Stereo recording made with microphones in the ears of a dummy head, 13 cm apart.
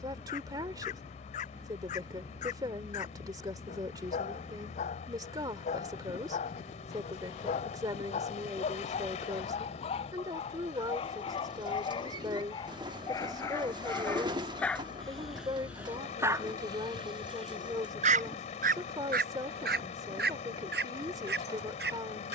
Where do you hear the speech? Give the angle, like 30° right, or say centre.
30° right.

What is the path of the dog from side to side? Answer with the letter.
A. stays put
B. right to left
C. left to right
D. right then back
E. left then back
C.